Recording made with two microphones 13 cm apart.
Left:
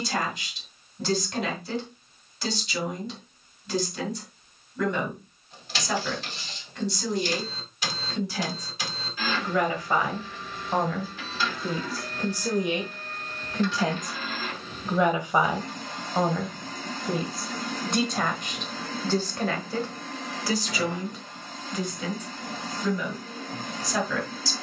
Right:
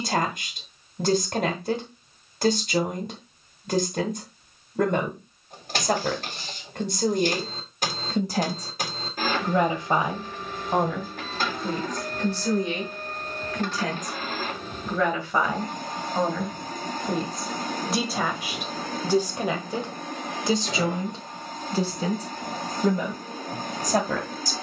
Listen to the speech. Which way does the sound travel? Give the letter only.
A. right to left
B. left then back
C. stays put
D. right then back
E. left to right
B.